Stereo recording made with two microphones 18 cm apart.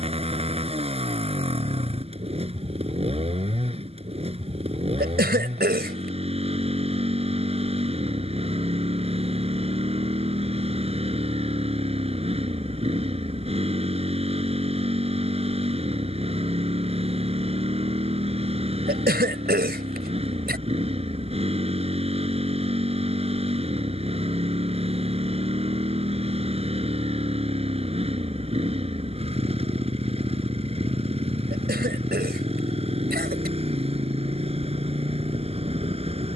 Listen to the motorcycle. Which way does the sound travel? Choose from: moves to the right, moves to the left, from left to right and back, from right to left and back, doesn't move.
doesn't move.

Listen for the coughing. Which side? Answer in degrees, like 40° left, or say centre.
70° right.